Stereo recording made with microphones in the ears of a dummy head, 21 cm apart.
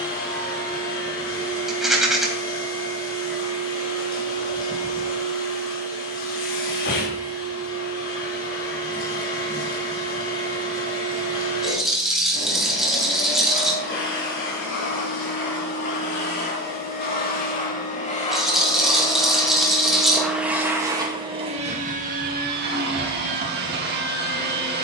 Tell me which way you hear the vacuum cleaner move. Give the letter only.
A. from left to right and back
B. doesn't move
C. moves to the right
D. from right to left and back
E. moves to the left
C.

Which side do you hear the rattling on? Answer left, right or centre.
centre.